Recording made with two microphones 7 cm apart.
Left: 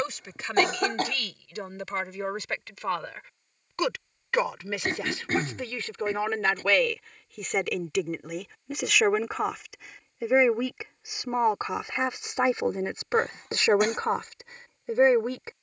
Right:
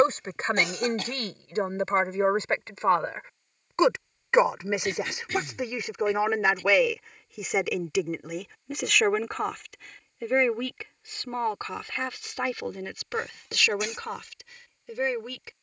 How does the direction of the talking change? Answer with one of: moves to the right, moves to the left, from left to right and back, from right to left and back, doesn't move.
moves to the left.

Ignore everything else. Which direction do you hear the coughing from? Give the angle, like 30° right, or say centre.
50° left.